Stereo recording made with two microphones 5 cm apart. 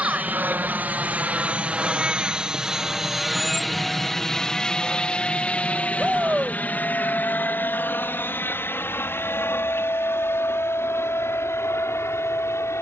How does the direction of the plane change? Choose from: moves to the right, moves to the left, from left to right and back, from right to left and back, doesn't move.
moves to the left.